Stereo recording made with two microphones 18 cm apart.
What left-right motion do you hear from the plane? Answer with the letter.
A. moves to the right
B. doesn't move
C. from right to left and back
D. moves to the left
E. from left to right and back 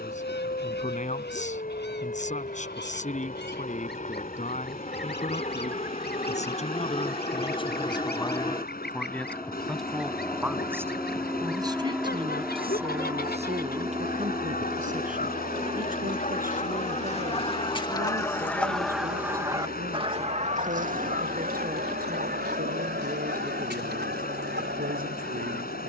A.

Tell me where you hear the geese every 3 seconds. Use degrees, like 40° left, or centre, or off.
80° left, 80° left, 70° left, 70° left, 60° left, 40° left, 20° right, 70° right, 80° right.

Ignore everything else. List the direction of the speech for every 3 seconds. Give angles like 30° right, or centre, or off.
40° left, 40° left, 30° left, 10° right, 40° right, 50° right, 50° right, 50° right, 50° right.